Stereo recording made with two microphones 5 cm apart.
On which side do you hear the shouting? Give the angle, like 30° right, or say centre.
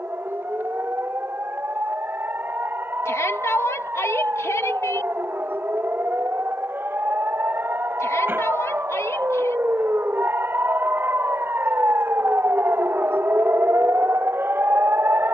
80° left.